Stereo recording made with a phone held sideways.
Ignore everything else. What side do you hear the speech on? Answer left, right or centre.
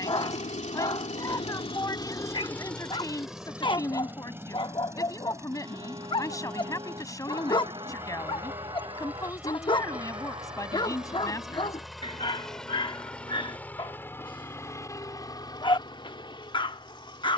left.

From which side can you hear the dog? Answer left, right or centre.
left.